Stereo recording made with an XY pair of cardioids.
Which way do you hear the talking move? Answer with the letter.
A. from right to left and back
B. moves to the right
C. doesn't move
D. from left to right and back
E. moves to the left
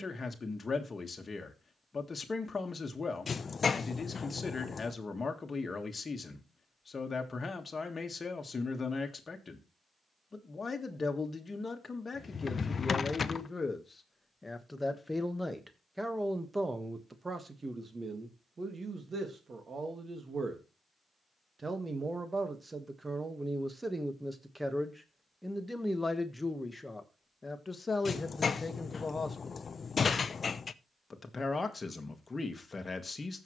D.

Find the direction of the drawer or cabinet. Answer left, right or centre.
left.